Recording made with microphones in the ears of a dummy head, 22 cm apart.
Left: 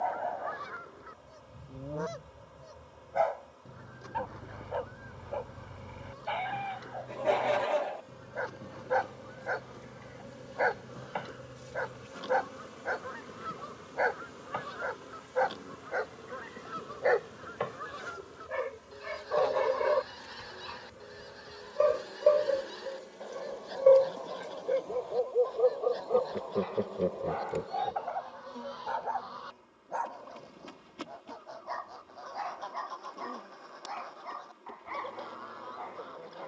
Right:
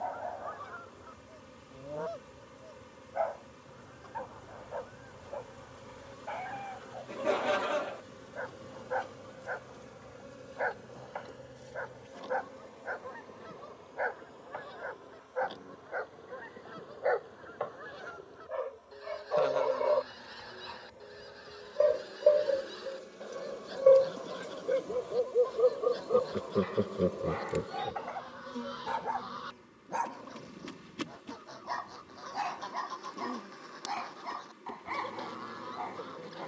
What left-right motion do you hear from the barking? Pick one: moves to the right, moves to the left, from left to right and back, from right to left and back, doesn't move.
moves to the right.